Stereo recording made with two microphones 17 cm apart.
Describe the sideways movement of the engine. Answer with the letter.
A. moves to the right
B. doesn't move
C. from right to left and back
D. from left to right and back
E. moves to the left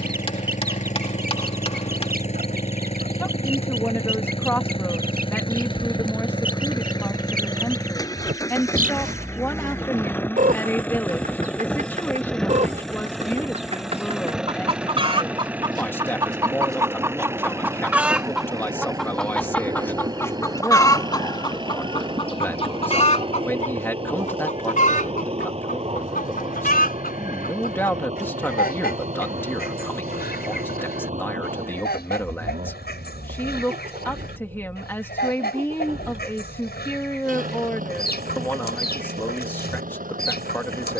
A.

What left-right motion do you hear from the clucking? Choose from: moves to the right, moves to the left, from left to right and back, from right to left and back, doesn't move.
moves to the left.